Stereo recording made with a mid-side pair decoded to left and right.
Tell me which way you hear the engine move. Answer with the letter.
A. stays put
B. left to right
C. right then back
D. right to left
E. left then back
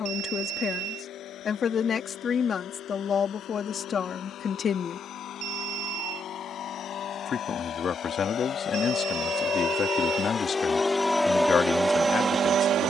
B.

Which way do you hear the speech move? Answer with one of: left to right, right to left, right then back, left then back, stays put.
stays put.